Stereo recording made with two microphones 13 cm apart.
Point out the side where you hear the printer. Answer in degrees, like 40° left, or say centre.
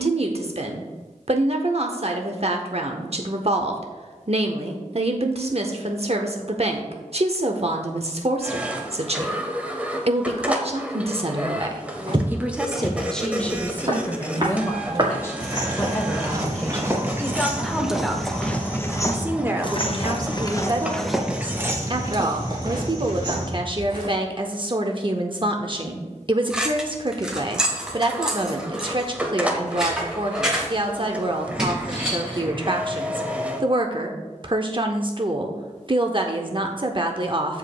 10° right.